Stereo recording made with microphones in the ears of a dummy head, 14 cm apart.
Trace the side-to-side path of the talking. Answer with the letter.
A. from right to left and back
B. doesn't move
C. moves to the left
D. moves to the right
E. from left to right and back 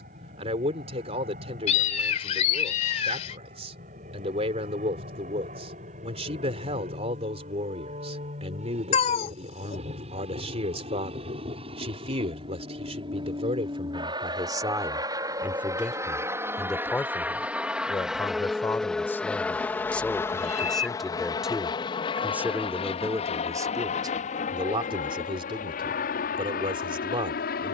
A.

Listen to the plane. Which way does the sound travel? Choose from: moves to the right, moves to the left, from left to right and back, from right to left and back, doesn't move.
moves to the left.